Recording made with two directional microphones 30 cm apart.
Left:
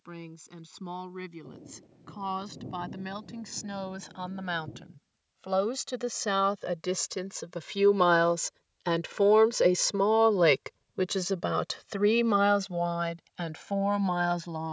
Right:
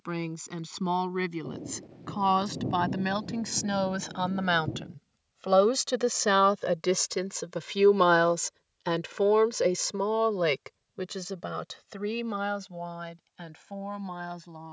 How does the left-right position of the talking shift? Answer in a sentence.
In this clip you hear the talking move from right to left.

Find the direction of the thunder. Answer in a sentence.
You can hear the thunder on the right.